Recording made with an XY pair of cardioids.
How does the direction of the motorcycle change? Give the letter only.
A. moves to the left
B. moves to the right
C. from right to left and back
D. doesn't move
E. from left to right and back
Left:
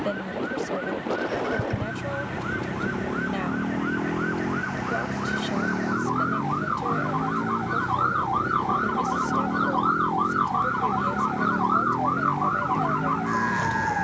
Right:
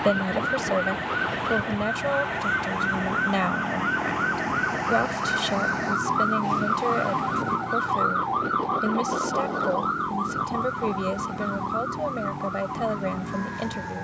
D.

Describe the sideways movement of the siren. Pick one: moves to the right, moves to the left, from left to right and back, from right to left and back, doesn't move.
moves to the left.